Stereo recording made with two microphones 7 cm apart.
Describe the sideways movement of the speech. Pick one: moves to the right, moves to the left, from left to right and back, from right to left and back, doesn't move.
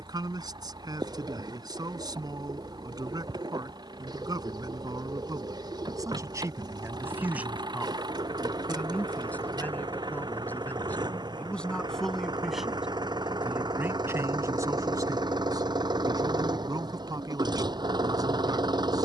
from right to left and back.